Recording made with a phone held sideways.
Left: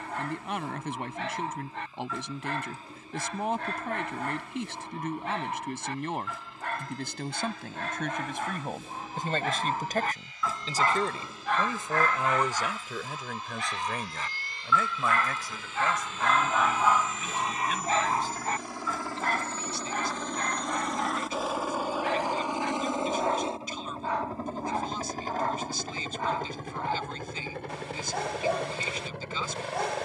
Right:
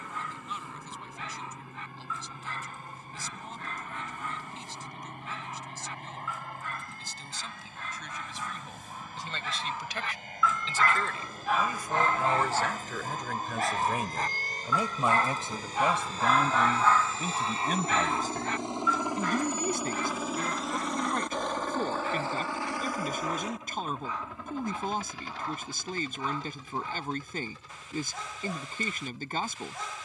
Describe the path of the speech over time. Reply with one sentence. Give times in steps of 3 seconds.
You can hear the speech on the left from 0 s, in the centre from 12 s and on the right from 15 s.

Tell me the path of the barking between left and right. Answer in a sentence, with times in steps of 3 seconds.
In this clip you hear the barking on the left from 0 s, on the right from 12 s, in the centre from 15 s and on the left from 18 s.